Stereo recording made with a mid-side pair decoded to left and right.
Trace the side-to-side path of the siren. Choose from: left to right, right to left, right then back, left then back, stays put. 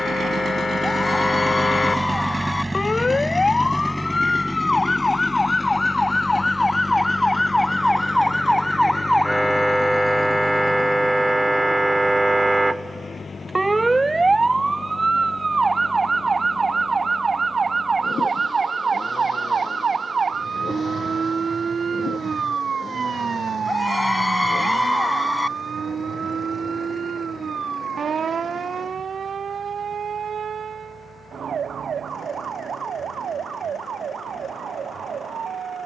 left to right.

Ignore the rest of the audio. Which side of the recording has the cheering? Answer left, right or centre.
left.